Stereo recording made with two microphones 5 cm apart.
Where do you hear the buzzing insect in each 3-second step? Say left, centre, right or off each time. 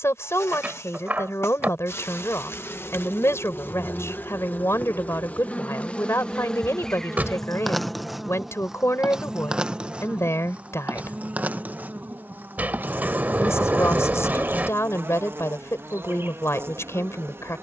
left, left, centre, right, right, right.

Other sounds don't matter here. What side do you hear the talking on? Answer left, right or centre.
left.